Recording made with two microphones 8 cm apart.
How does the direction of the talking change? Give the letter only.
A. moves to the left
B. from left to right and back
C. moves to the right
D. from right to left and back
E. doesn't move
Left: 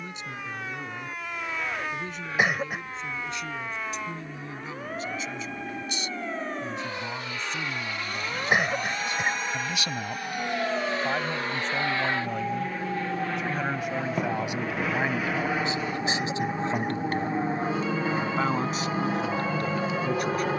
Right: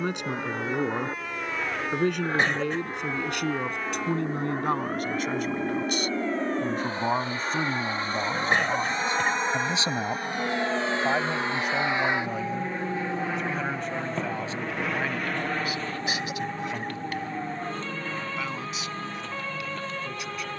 A.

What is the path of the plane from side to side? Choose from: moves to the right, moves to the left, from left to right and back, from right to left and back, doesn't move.
moves to the left.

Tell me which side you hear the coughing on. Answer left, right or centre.
centre.